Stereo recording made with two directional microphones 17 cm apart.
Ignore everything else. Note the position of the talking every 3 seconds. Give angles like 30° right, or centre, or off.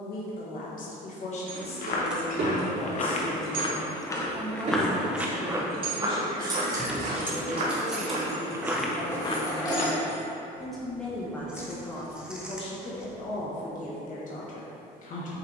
40° left, 10° right, 30° right, centre, 40° left.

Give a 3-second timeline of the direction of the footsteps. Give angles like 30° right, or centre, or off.
50° left, 10° left, 30° right, 40° left, off.